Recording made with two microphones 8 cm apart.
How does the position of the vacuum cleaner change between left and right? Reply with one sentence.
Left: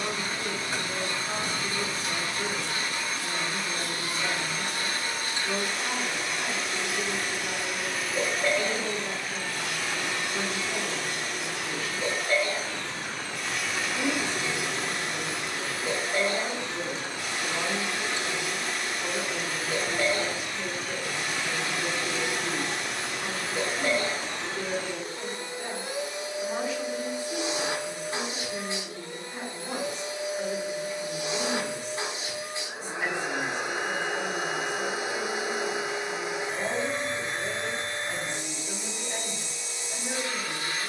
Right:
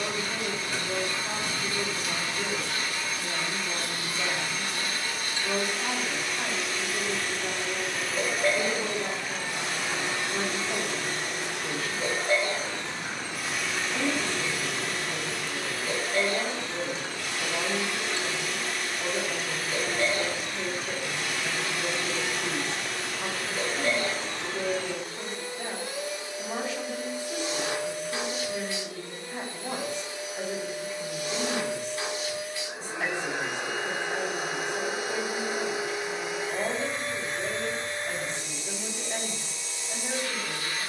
You can hear the vacuum cleaner move from left to right and back again.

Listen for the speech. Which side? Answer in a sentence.
In this clip you hear the speech on the right.